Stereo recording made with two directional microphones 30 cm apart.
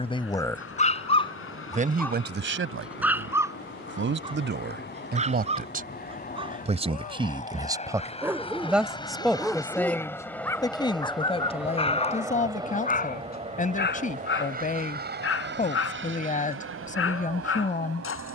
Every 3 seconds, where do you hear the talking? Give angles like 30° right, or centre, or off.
20° right, 40° right, 10° right, 10° left, 30° left, 30° left.